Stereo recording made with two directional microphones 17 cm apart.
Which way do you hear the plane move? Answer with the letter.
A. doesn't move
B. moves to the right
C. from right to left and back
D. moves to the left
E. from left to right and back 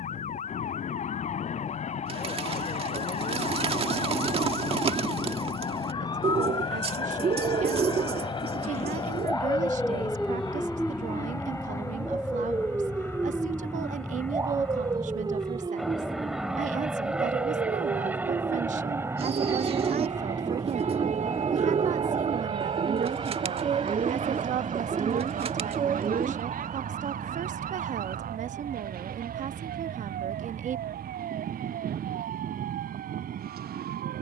B.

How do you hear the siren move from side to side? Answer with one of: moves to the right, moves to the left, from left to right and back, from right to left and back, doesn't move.
moves to the right.